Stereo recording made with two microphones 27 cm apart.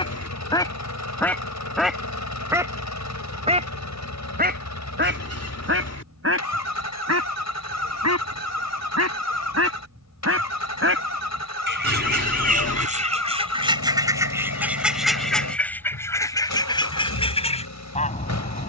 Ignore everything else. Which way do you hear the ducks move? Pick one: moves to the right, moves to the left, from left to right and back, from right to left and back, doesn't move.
from left to right and back.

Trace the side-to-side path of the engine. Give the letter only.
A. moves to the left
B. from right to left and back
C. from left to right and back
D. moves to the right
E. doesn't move
E.